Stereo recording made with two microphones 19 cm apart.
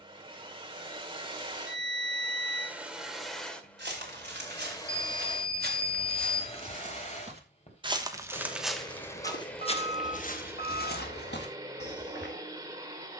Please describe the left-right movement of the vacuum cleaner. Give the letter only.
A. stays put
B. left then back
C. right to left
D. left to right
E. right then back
B.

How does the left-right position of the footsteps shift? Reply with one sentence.
In this clip you hear the footsteps move from right to left.